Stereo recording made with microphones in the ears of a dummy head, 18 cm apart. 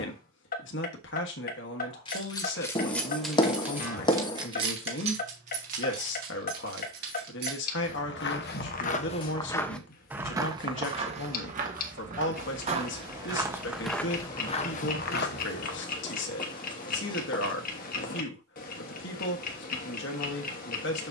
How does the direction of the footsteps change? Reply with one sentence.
You can hear the footsteps go right and come back.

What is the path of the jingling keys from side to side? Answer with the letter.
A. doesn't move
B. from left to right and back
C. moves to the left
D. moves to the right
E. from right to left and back
D.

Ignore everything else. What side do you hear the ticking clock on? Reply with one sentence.
You can hear the ticking clock on the left.